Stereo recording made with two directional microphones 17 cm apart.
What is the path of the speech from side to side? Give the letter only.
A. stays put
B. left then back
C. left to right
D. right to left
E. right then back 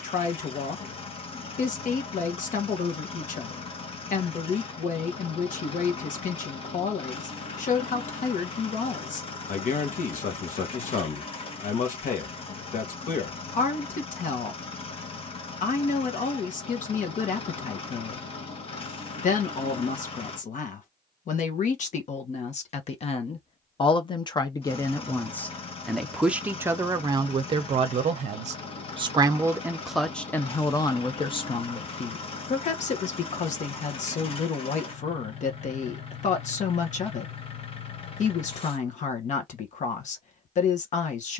E.